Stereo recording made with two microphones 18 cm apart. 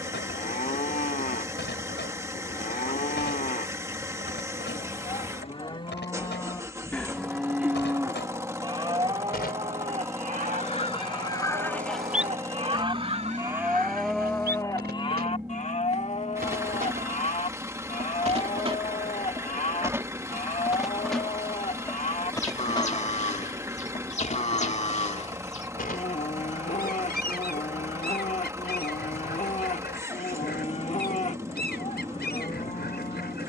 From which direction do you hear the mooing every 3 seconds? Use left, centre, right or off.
left, left, centre, right, centre, left, left, left, left, left, left.